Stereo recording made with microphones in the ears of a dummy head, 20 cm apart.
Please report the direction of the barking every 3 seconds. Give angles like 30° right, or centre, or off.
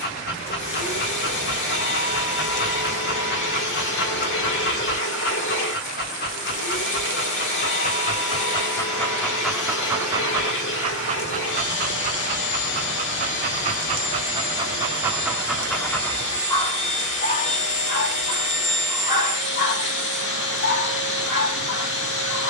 50° left, 50° left, 40° left, 20° right, 30° right, 10° left, 40° left, 50° left.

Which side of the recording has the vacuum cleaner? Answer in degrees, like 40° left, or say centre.
50° left.